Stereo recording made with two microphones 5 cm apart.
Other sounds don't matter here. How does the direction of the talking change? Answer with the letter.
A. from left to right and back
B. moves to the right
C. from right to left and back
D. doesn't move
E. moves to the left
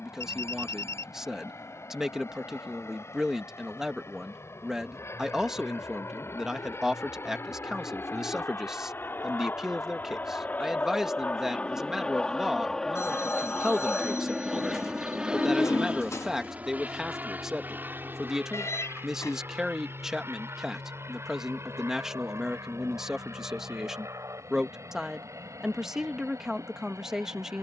D.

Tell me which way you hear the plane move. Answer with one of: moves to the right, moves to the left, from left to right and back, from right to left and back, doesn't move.
moves to the right.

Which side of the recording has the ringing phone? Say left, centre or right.
left.